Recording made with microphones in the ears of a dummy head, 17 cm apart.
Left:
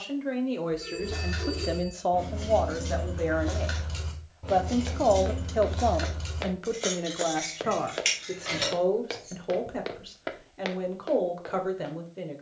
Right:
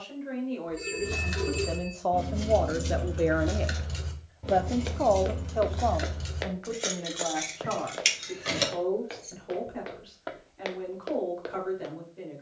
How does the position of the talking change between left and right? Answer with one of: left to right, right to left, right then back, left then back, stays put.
right then back.